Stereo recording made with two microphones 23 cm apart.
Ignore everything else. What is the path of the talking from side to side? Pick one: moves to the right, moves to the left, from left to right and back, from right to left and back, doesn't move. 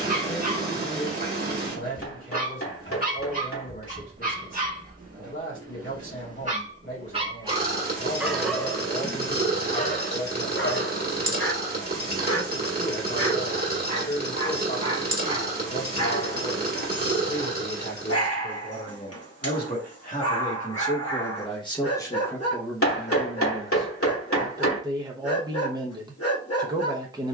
moves to the right.